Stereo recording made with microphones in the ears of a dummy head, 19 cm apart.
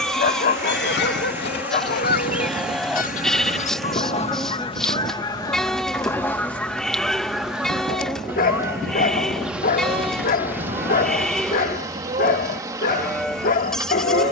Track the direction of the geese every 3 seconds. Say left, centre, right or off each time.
left, left, centre, right, right.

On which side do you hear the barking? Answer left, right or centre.
left.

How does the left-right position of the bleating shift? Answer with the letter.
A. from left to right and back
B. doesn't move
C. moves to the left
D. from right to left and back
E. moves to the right
B.